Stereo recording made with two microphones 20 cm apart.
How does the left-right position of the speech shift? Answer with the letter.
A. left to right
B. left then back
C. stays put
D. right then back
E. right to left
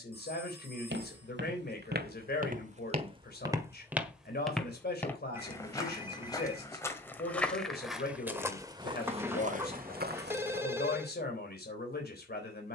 C.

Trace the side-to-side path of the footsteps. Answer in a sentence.
You can hear the footsteps go left and come back.